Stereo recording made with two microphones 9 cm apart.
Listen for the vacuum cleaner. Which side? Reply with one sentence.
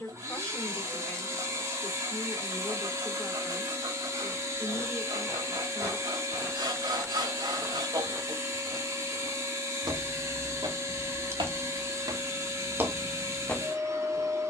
You can hear the vacuum cleaner on the right.